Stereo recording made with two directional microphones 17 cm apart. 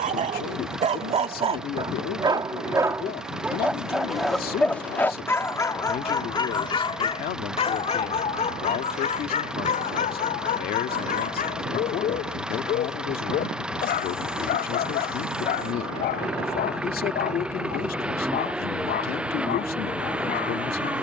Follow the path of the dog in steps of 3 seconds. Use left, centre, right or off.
right, centre, left, left, left, left, left.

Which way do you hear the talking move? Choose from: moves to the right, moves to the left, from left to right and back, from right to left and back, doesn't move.
doesn't move.